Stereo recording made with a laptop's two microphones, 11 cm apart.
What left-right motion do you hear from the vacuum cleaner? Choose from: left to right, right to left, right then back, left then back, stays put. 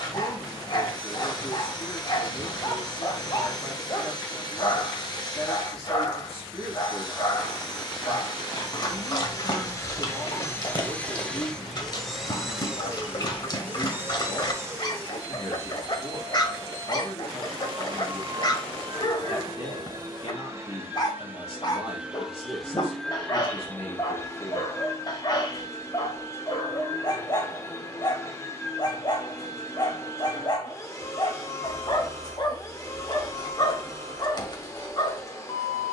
right then back.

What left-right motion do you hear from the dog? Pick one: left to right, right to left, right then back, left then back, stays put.
stays put.